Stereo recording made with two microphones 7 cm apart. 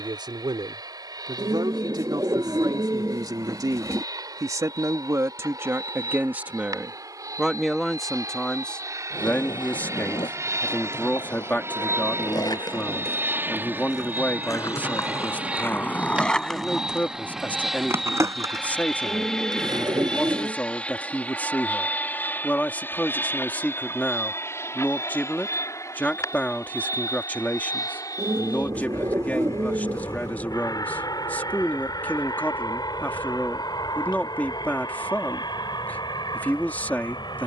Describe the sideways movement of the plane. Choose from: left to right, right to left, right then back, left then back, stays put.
right to left.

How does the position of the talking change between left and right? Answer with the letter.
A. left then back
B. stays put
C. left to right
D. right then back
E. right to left
E.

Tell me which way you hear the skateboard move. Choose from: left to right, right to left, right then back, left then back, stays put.
left to right.